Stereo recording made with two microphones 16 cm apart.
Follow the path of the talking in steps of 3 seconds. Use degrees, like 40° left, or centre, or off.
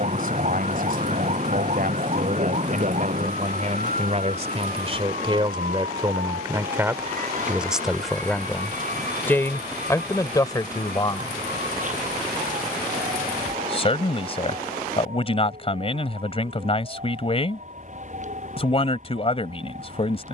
60° right, 40° right, 10° right, 20° left, 40° left, 40° left, 40° left.